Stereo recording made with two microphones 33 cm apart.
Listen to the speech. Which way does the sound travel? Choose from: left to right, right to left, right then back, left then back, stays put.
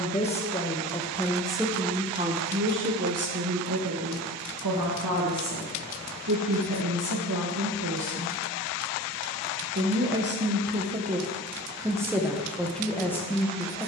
right then back.